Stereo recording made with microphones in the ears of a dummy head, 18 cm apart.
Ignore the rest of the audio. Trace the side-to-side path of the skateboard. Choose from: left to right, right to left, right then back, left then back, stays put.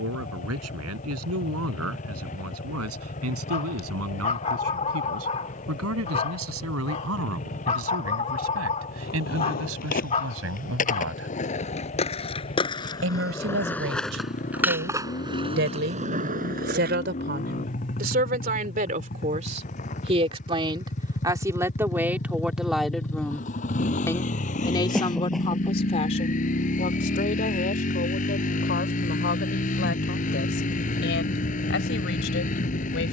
left to right.